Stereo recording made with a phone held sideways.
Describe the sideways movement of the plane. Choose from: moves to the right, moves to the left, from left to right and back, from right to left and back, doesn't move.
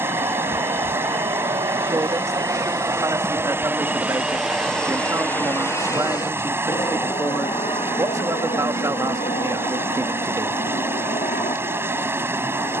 moves to the left.